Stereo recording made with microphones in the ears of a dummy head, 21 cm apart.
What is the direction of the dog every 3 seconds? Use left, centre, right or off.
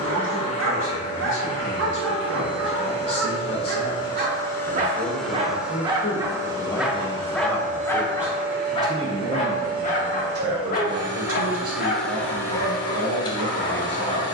right, right, centre, left, left.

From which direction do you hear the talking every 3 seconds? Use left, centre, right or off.
left, left, centre, right, right.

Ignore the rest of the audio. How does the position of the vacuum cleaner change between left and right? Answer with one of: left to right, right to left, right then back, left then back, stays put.
right then back.